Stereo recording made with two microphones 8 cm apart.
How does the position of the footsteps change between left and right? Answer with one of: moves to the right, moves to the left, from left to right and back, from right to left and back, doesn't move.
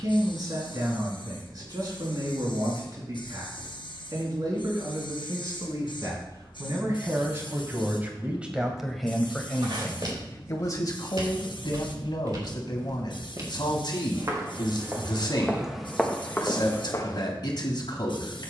moves to the left.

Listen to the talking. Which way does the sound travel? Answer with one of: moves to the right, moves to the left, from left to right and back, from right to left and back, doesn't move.
moves to the left.